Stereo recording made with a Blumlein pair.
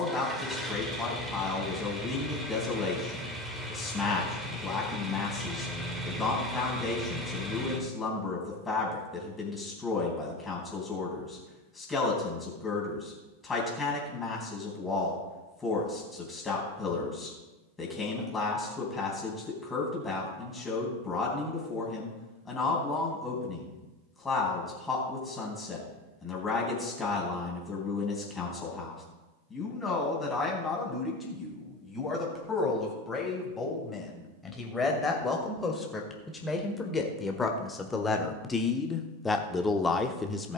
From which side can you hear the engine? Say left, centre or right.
centre.